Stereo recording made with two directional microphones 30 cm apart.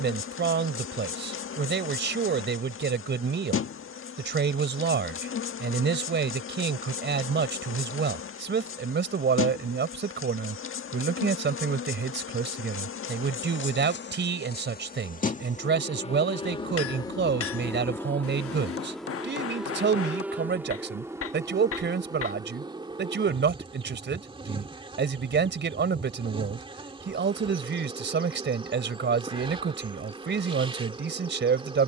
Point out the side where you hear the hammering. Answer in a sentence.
In this clip you hear the hammering on the left.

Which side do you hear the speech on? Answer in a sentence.
In this clip you hear the speech on the right.